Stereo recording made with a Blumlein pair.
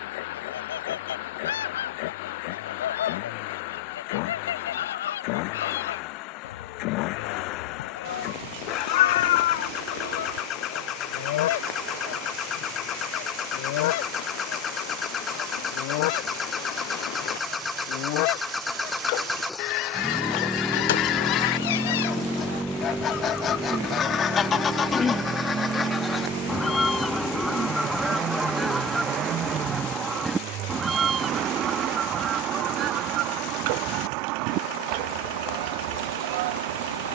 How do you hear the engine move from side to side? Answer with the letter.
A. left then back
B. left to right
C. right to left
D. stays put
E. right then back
B.